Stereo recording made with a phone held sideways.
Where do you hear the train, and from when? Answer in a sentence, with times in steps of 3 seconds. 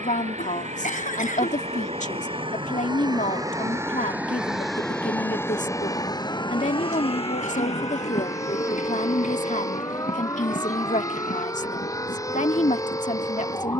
In this clip you hear the train on the right from 0 s, in the centre from 3 s and on the left from 6 s.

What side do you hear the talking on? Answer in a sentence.
In this clip you hear the talking on the left.